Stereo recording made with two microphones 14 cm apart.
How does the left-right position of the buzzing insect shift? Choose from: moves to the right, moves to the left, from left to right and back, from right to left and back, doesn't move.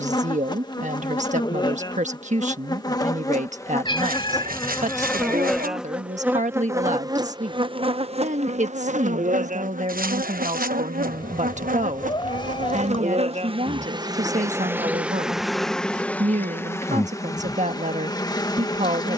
from left to right and back.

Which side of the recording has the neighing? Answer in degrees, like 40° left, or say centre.
70° right.